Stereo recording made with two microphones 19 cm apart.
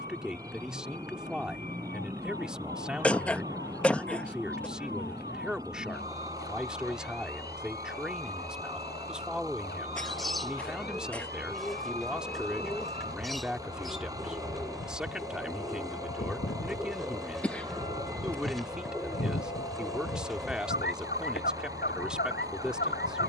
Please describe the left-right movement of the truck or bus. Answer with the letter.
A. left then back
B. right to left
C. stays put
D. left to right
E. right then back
C.